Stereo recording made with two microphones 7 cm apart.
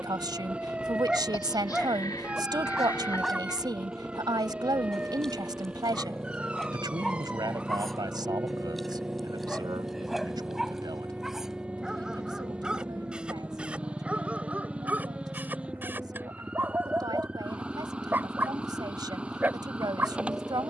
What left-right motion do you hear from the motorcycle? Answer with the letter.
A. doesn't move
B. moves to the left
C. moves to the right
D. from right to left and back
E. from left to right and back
A.